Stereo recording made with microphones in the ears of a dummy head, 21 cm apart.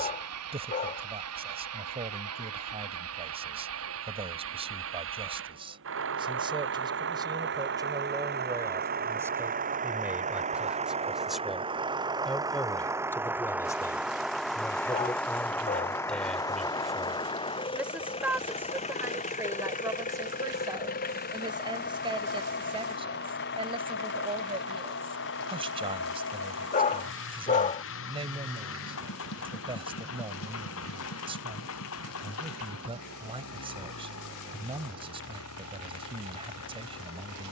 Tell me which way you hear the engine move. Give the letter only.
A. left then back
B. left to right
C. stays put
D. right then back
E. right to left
E.